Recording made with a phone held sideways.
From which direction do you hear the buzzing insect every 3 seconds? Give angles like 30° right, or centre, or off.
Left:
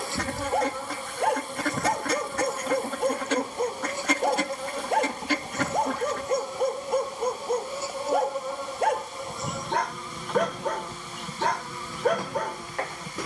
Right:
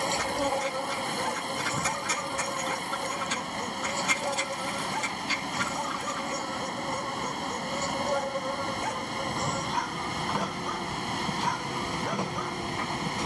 10° right, 20° left, 10° left, 10° right, 20° right.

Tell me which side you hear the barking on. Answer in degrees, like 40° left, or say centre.
70° left.